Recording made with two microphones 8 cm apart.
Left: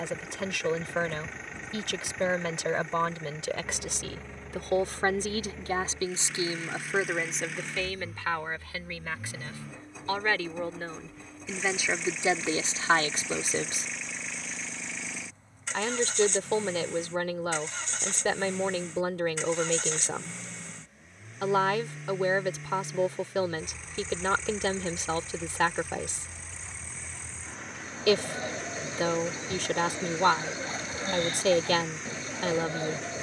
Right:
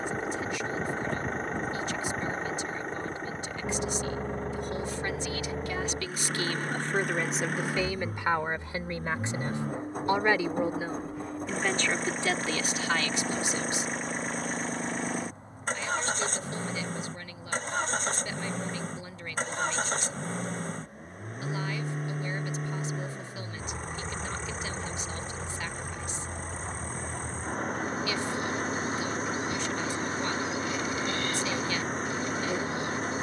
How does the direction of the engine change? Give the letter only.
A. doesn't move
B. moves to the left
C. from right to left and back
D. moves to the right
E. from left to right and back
A.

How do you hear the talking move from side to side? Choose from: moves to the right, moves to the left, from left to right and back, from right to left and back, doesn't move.
from left to right and back.